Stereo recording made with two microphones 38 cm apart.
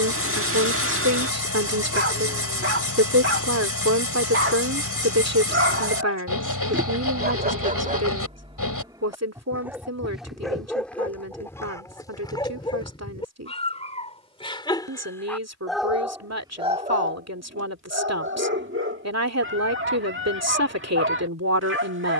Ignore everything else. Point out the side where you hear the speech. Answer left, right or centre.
right.